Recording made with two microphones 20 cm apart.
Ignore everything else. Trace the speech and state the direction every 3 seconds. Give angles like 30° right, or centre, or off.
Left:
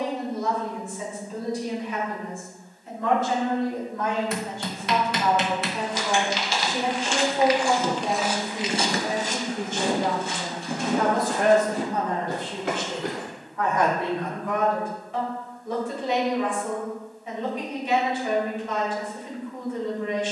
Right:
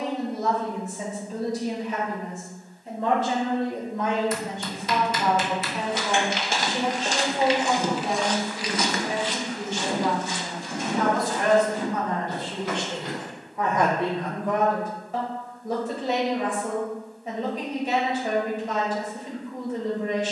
40° right, 20° right, 20° left, 50° left, 10° right, 40° right, 40° right.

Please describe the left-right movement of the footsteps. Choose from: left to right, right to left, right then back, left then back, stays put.
right to left.